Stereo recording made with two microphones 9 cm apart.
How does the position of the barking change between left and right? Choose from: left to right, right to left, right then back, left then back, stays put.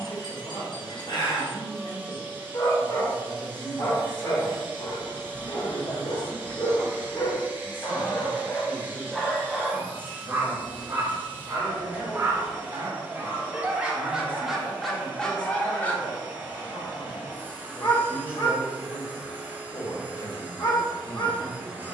right then back.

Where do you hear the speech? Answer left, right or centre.
left.